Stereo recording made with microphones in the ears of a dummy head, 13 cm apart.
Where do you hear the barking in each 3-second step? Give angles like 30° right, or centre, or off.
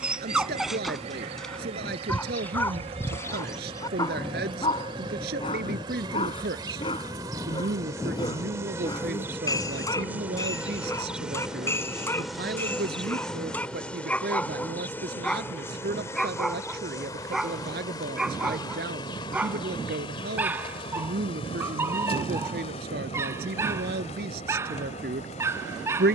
centre, 20° left, 30° left, 20° left, 10° left, centre, 10° right, 20° right, 20° right.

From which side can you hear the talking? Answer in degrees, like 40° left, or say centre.
70° right.